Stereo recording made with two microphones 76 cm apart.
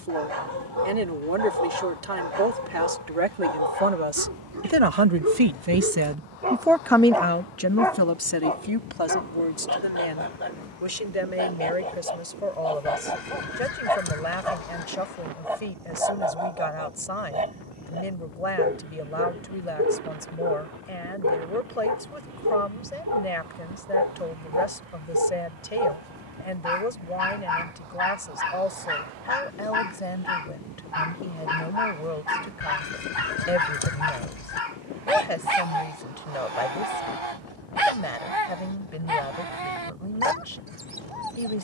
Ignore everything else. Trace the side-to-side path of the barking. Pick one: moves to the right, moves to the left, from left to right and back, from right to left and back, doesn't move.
from right to left and back.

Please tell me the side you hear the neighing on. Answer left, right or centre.
left.